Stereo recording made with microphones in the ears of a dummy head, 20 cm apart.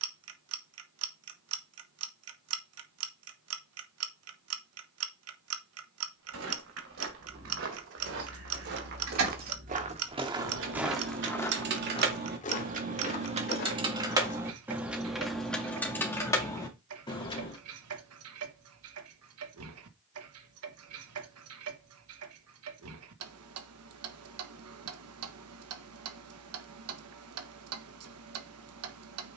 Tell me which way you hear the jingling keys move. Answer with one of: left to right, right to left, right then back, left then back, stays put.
right to left.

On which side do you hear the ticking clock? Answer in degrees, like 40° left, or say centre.
80° right.